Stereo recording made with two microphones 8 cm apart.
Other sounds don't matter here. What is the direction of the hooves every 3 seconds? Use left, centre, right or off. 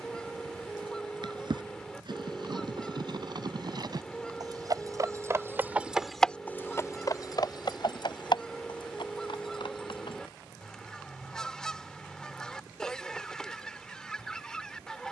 right, right, left, left, off.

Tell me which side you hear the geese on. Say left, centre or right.
centre.